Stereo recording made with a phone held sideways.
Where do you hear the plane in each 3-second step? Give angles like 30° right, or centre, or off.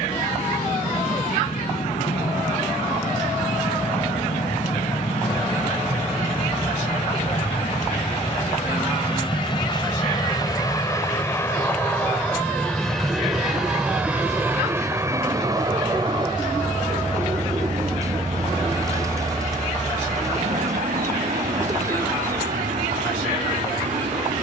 70° left, 60° left, 50° left, 30° left, centre, 30° right, 50° right, 60° right.